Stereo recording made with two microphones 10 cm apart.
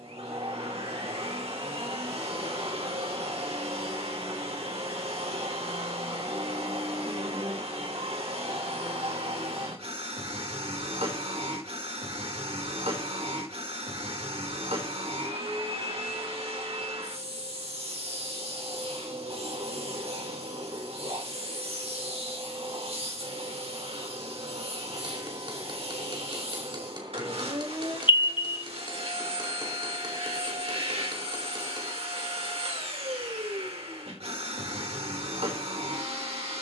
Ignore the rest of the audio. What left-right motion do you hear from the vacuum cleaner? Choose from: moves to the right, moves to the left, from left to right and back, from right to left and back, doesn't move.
doesn't move.